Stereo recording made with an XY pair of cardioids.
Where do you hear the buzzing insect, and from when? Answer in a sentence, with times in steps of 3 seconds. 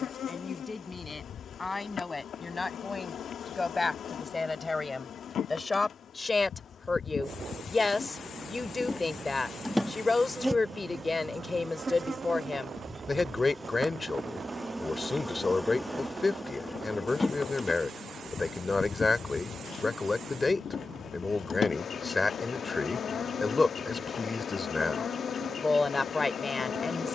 You can hear the buzzing insect on the left from 0 s, in the centre from 9 s, on the right from 12 s, in the centre from 15 s and on the left from 18 s.